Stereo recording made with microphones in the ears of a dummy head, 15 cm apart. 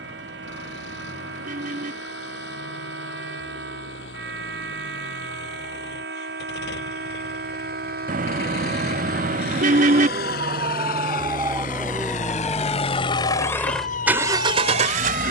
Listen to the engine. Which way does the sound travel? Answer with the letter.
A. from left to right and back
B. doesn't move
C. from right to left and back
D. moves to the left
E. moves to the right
E.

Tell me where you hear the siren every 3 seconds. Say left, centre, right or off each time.
right, right, right, right, left.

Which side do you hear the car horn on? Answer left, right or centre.
right.